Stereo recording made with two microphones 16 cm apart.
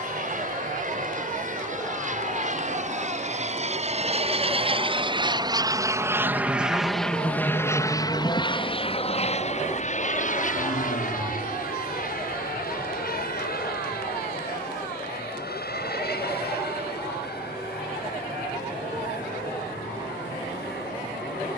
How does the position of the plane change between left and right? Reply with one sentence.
In this clip you hear the plane go from the right side to the left.